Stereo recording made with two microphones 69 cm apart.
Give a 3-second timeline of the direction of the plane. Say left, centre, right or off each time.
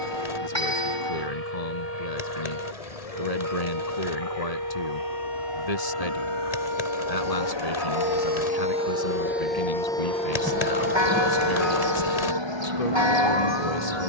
left, left, left, centre, right.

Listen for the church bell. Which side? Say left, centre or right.
right.